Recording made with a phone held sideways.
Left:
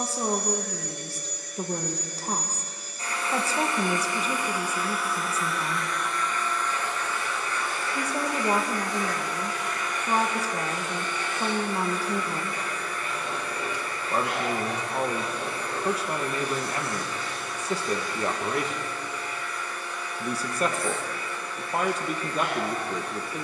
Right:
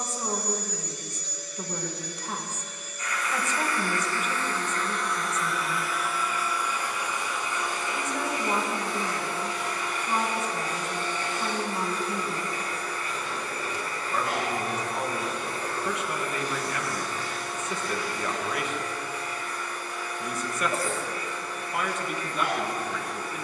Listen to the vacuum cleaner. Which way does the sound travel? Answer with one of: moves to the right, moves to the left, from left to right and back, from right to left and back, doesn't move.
moves to the right.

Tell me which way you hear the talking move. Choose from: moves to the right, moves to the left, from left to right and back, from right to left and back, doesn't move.
doesn't move.